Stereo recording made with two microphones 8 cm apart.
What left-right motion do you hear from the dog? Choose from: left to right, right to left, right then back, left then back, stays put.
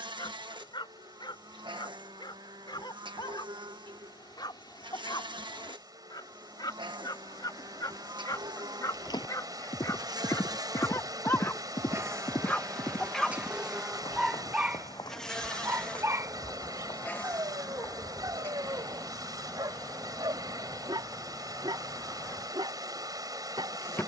left to right.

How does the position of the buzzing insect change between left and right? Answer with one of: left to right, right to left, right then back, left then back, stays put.
right to left.